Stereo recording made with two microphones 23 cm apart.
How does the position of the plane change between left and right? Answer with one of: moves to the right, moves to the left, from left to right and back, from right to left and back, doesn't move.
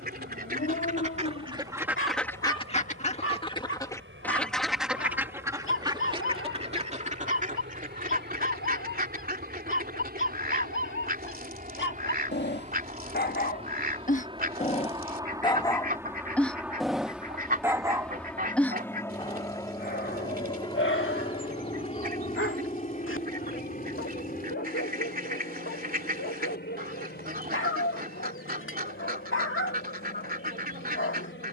moves to the left.